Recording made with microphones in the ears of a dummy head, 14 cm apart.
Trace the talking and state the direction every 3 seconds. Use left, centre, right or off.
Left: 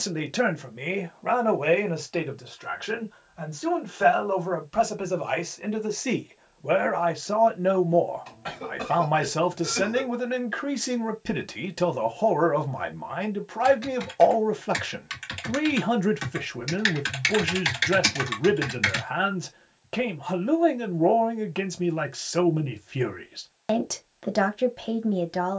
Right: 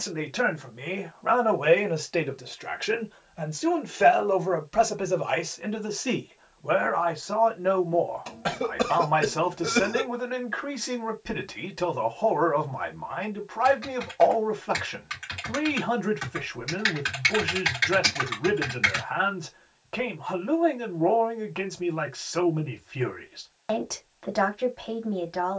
centre, centre, left, left, left, left, left, left, left.